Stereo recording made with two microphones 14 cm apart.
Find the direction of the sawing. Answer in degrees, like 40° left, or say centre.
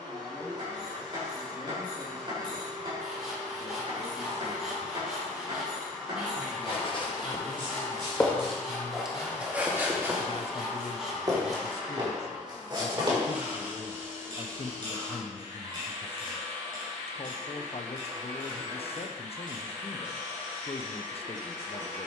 centre.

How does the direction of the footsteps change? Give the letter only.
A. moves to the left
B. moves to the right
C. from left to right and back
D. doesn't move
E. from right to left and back
B.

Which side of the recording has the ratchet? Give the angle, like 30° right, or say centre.
40° right.